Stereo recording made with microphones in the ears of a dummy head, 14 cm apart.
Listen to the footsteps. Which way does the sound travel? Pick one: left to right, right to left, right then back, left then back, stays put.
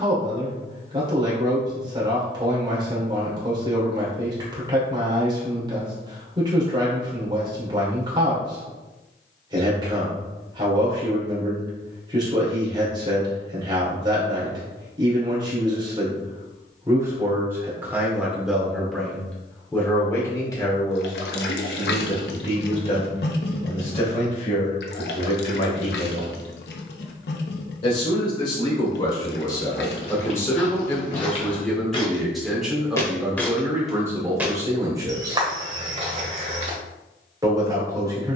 left to right.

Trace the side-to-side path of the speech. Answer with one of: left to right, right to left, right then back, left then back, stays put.
left then back.